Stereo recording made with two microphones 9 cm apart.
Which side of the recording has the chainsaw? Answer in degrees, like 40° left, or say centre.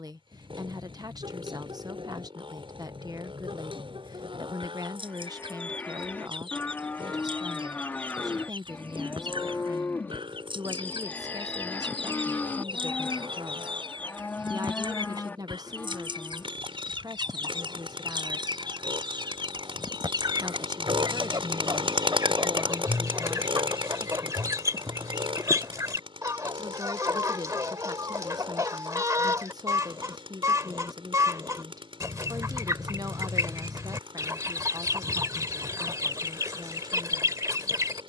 80° right.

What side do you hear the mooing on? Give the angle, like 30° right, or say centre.
20° left.